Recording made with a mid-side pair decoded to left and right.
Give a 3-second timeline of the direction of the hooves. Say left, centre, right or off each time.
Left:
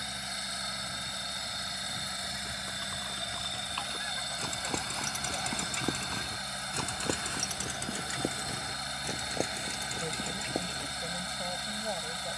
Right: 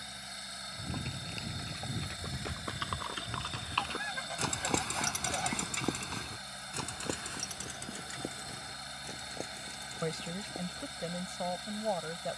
right, right, left, left.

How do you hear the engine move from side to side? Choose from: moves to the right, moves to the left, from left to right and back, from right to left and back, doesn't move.
doesn't move.